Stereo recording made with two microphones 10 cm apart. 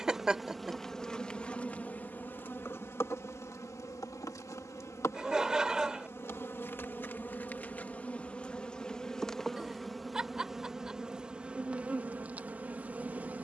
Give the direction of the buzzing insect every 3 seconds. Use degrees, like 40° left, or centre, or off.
10° left, 30° left, 20° left, centre, 20° right.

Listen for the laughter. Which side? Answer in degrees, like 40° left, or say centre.
10° right.